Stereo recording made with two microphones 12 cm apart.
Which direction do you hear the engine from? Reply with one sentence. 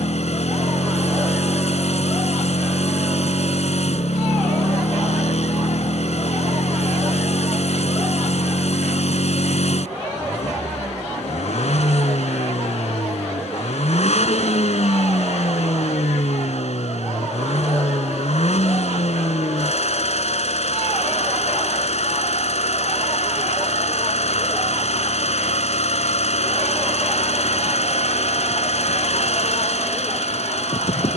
In this clip you hear the engine on the left.